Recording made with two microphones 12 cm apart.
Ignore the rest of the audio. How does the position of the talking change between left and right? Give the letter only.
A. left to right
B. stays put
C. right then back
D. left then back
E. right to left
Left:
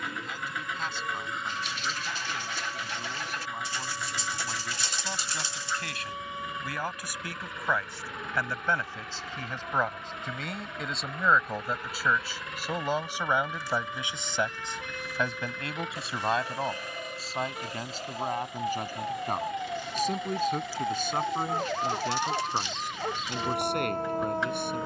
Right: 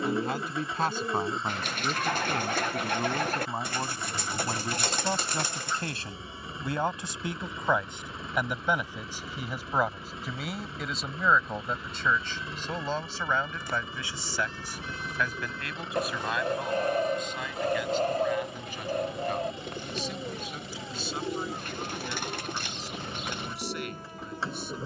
E.